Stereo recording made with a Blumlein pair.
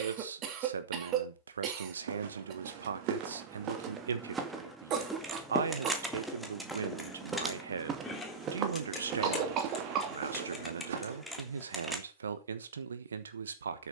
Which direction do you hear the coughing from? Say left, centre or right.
right.